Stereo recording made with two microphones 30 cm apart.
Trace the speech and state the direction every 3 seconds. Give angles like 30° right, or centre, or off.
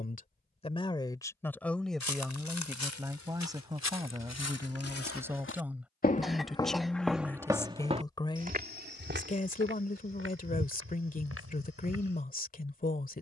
10° left, 10° right, 10° left, 30° left, 30° left.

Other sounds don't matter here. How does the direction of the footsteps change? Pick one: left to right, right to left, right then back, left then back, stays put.
left to right.